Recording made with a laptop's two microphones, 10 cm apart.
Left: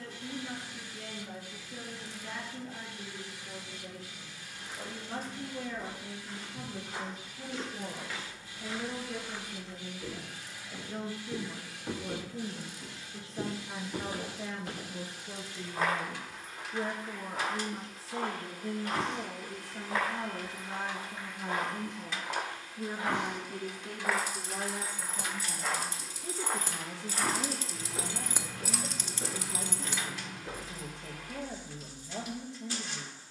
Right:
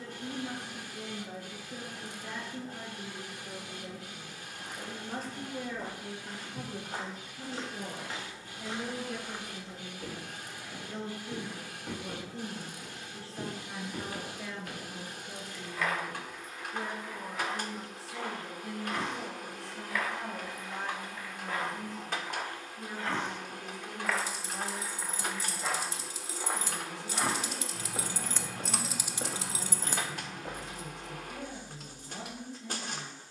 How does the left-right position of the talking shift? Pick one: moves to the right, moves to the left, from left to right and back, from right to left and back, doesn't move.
moves to the left.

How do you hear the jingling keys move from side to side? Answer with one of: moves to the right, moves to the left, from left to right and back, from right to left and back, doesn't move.
moves to the right.